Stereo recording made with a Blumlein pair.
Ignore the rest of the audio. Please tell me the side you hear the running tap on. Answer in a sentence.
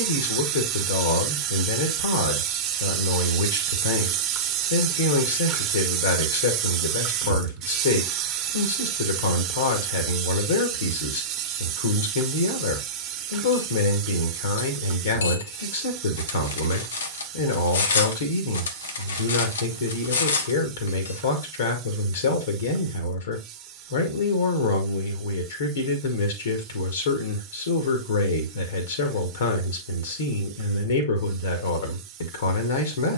You can hear the running tap on the right.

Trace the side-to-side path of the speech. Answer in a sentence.
You can hear the speech stay in one place.